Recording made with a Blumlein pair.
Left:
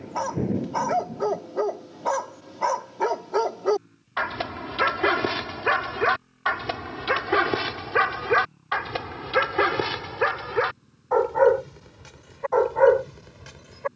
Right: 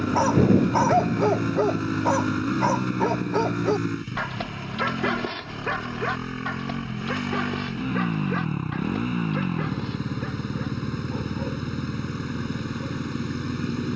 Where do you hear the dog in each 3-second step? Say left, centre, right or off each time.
centre, centre, left, left, left.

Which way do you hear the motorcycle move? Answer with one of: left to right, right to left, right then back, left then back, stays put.
stays put.